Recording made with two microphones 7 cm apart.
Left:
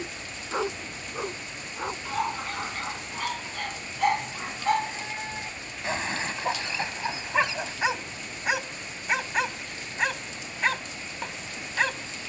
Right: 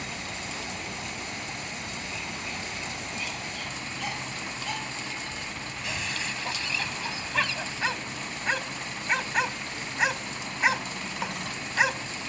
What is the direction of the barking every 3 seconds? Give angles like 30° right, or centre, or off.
60° left, 40° left, 20° left, 10° right.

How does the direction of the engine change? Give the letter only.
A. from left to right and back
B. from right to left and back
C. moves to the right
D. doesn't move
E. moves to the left
D.